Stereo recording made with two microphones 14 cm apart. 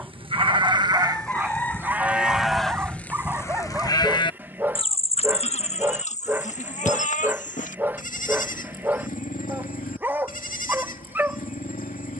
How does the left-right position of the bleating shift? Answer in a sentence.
In this clip you hear the bleating move from right to left.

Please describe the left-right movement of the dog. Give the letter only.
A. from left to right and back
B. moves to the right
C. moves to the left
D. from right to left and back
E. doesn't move
E.